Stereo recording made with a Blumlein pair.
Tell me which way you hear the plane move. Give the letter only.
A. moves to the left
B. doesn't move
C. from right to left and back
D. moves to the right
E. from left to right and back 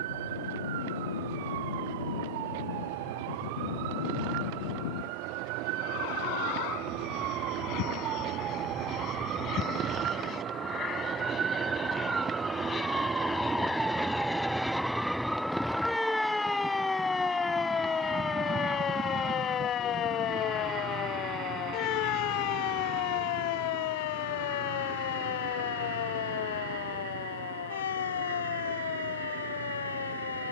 D.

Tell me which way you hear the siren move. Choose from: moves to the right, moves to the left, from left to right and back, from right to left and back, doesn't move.
moves to the left.